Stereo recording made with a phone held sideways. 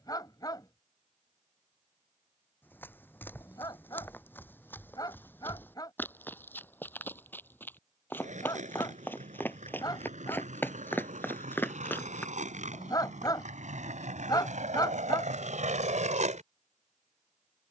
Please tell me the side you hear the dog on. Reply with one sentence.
You can hear the dog on the left.